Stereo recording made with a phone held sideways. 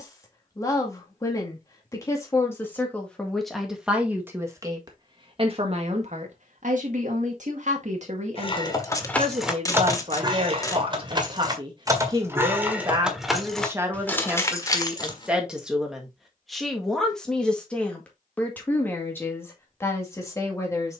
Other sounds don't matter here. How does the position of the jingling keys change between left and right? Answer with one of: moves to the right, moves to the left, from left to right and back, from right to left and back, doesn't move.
from left to right and back.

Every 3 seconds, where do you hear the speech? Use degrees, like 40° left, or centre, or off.
20° left, 20° right, 60° right, 40° right, 20° right, centre, 20° left.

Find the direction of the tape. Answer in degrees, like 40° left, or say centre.
20° left.